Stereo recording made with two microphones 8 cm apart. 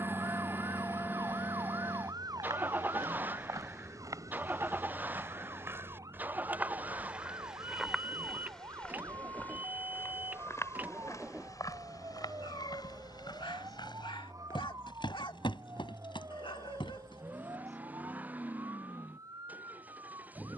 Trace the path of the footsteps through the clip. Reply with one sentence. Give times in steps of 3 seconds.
In this clip you hear the footsteps on the right from 0 s, in the centre from 6 s, on the left from 9 s and not at all from 18 s.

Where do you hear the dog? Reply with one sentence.
You can hear the dog on the left.